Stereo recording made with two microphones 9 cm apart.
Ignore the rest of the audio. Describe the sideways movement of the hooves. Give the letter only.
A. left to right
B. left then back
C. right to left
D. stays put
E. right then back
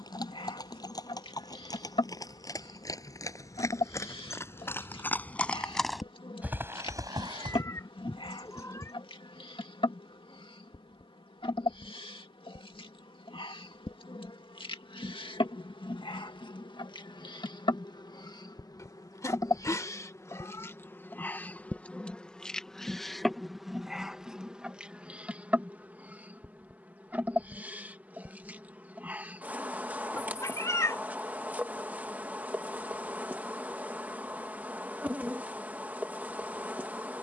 A.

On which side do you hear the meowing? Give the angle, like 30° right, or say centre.
40° left.